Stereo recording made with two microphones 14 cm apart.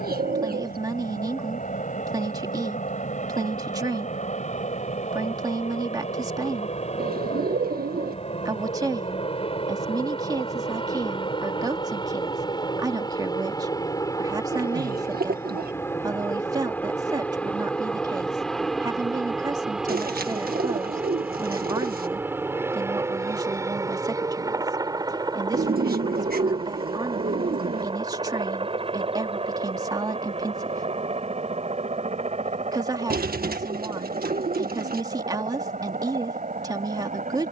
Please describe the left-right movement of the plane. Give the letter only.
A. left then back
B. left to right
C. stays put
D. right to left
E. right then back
B.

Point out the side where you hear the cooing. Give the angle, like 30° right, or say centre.
80° right.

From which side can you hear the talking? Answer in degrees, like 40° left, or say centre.
30° right.